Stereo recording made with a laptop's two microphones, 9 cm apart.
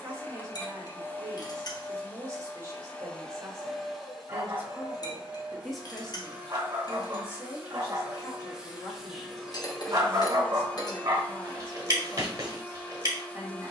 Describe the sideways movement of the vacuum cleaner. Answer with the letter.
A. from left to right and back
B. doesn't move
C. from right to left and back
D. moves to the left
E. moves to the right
A.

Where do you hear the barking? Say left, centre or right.
right.